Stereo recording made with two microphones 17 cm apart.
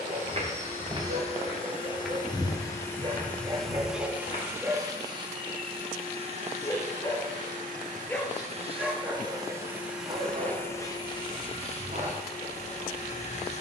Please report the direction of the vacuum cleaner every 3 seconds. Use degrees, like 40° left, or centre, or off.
30° left, 10° right, 40° right, 10° left, 40° left.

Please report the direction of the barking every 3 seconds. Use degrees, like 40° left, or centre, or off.
40° right, 20° right, 20° left, 40° right, 50° right.